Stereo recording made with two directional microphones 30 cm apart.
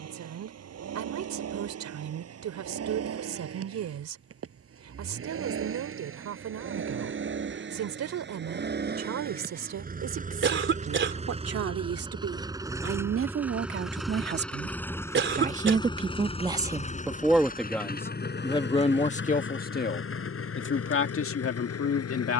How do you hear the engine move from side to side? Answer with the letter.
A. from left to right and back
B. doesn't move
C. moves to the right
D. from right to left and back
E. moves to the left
E.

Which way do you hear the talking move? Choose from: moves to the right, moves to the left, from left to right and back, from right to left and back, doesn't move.
moves to the left.